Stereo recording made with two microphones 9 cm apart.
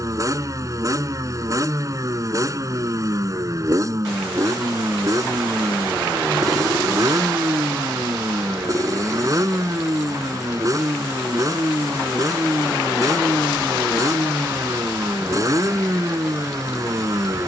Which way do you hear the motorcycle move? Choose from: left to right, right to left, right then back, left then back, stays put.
stays put.